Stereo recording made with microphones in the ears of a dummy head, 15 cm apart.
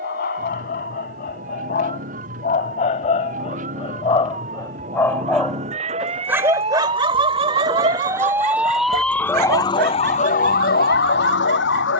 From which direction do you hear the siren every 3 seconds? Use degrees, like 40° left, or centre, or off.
50° right, 50° right, 30° right, 50° left.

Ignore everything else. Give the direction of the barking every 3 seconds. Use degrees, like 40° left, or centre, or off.
50° left, 30° left, 40° right, 70° right.